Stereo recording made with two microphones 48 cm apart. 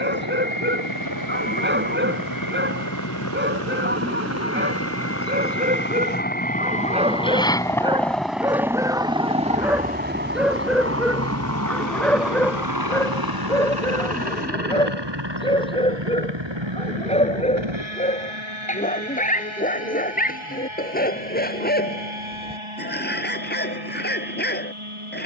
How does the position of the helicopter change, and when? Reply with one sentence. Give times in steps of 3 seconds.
You can hear the helicopter on the left from 0 s, in the centre from 6 s and on the right from 9 s.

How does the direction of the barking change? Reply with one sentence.
You can hear the barking go from the right side to the left.